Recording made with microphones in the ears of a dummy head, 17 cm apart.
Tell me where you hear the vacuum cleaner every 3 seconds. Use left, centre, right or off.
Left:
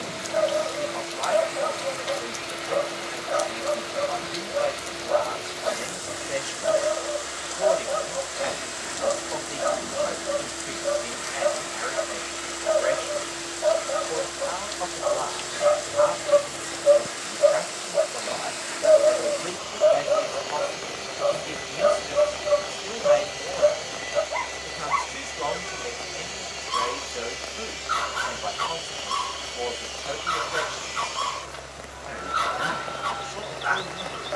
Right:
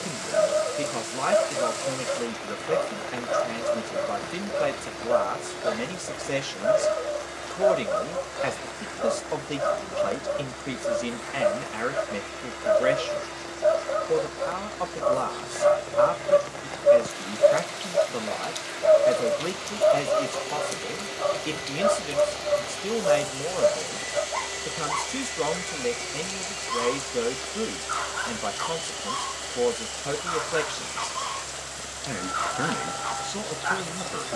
left, left, left, left, left, left, left, left, centre, left, left, left.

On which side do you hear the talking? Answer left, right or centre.
right.